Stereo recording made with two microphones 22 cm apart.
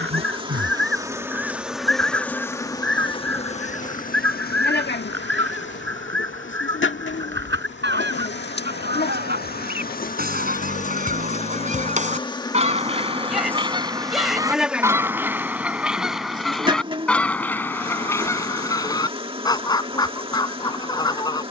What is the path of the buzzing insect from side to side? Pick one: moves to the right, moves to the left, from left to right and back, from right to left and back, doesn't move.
from right to left and back.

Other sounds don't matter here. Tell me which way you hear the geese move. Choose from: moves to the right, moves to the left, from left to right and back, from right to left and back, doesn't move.
moves to the left.